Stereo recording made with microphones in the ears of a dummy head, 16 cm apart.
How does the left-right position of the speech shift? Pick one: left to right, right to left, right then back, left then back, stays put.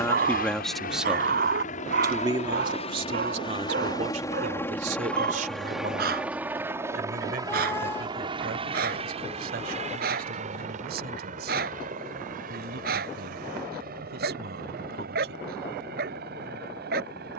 left to right.